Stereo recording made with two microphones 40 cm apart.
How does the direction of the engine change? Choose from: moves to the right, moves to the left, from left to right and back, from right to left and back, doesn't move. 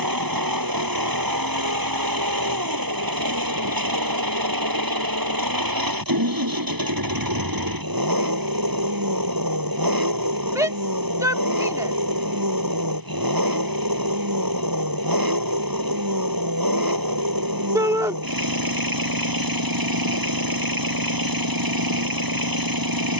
doesn't move.